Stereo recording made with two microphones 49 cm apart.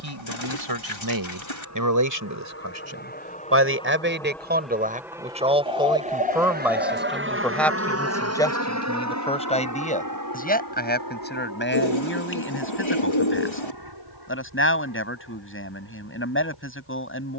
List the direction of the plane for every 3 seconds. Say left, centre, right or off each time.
left, centre, right, right, right, right.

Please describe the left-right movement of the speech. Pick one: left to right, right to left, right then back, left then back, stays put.
right to left.